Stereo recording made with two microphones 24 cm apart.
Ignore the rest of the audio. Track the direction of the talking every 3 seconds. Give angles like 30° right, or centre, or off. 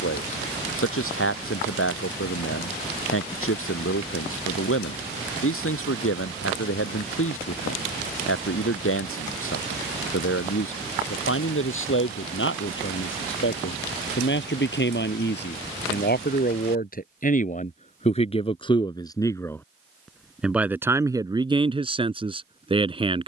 60° left, 60° left, 60° left, 60° left, 60° left, 40° left, 10° left, 20° right.